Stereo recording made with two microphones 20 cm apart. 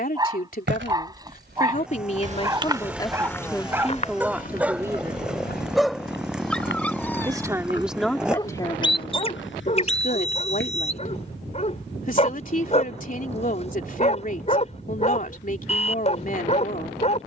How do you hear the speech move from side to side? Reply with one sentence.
You can hear the speech go right and come back.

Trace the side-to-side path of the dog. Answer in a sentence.
You can hear the dog go from the right side to the left.